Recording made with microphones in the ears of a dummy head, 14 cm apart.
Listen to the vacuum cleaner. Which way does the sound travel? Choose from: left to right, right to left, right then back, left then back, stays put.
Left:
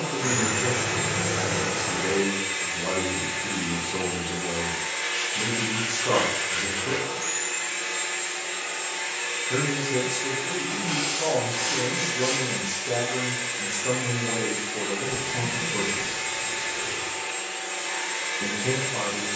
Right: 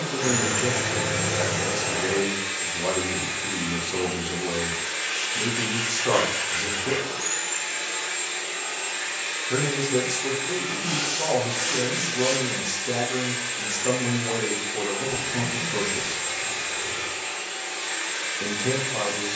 stays put.